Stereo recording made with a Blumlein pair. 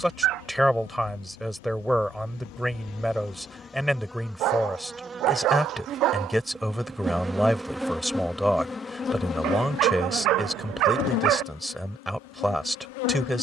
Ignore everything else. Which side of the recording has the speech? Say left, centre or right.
centre.